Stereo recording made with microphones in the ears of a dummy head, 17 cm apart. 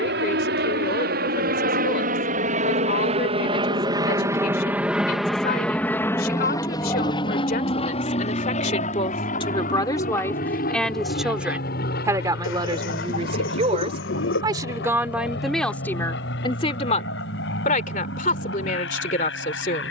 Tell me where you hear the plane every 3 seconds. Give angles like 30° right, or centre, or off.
50° right, 10° right, 30° left, 40° left, 50° left, 60° left, 60° left.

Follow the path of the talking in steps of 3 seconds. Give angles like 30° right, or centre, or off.
50° left, 50° left, 50° left, 10° left, 30° right, 20° left, 40° left.